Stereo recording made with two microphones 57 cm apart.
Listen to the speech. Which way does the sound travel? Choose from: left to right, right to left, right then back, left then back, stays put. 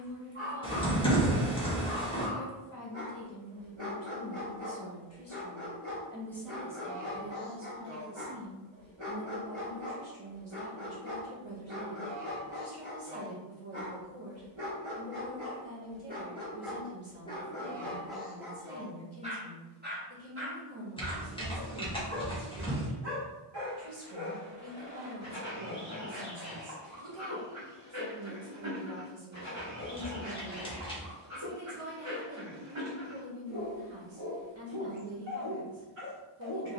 left to right.